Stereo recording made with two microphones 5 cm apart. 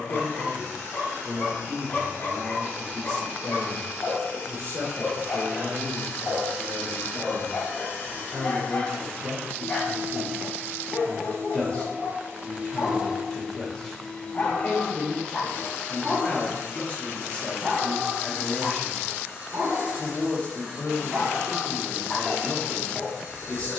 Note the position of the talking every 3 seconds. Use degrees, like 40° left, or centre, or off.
60° right, 60° right, 40° right, centre, 20° left, 20° left, 20° left, 20° left.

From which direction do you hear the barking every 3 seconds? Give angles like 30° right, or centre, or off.
40° left, 40° left, 40° left, 40° left, 40° left, centre, 40° right, 10° left.